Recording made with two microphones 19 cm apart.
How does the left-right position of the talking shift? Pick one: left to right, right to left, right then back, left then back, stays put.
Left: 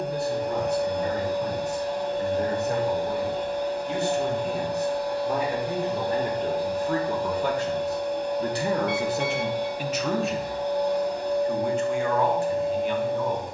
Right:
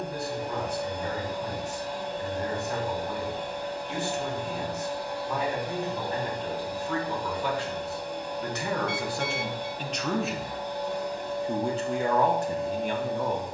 left to right.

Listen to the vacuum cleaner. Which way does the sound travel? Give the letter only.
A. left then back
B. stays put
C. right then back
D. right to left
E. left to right
B.